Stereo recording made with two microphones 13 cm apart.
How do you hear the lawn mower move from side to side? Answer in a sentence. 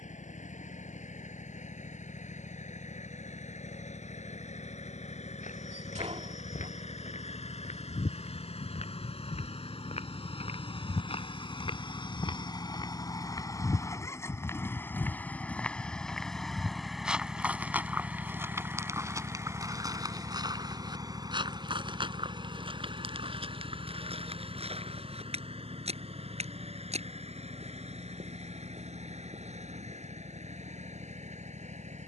You can hear the lawn mower move to the right.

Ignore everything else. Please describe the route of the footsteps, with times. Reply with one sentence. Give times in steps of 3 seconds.
You can hear the footsteps not at all from 0 s, on the left from 3 s, in the centre from 15 s, on the right from 18 s and not at all from 30 s.